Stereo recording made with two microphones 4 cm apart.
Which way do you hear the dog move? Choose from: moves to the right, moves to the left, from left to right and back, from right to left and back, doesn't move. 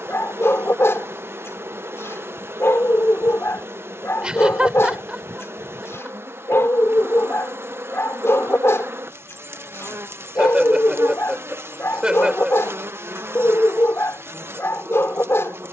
doesn't move.